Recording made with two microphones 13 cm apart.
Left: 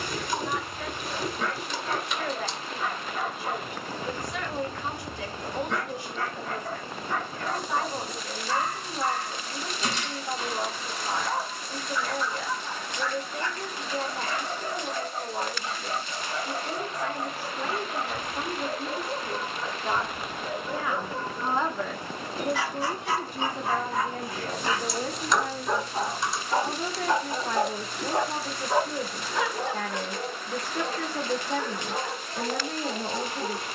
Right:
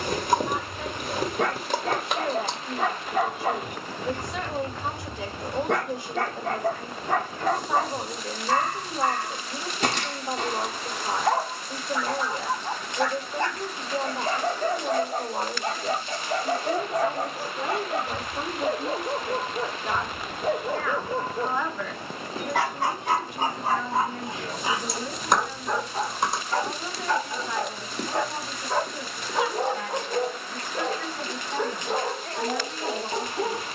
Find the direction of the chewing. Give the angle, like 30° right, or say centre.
50° right.